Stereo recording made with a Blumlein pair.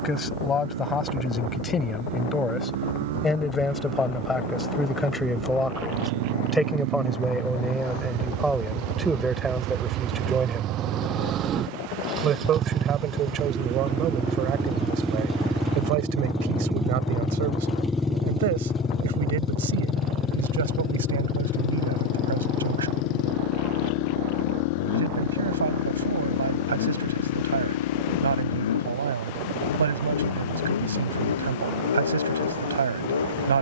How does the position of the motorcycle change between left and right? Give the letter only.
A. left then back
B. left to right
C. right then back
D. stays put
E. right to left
E.